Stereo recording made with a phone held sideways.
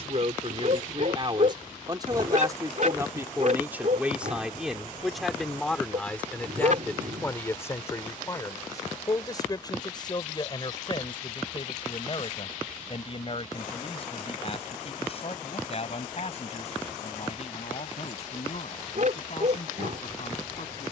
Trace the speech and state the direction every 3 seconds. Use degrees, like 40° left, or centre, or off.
30° right, 10° right, 20° left, 30° left, 40° left, 50° left, 50° left.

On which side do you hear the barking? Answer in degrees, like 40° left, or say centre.
60° right.